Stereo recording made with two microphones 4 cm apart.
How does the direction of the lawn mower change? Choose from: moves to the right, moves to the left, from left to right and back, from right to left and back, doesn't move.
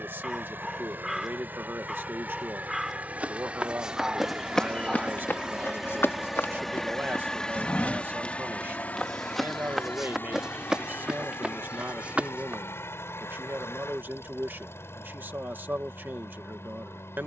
moves to the left.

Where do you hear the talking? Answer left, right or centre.
right.